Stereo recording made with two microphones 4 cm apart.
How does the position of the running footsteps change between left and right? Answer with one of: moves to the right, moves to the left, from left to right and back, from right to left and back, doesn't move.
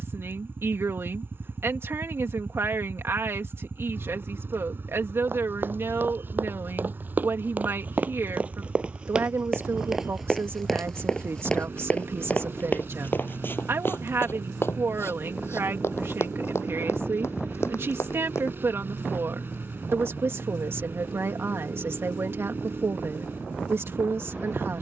moves to the left.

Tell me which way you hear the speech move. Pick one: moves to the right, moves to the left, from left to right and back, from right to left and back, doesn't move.
doesn't move.